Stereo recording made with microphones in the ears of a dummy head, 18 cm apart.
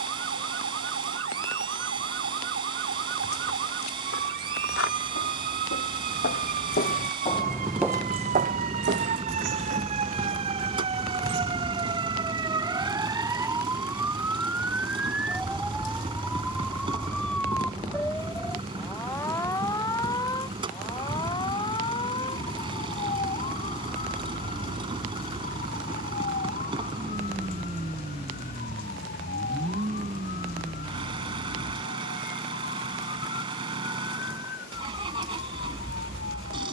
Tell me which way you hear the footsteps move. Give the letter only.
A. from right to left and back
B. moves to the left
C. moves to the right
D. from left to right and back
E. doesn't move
C.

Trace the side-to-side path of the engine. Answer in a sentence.
In this clip you hear the engine stay put.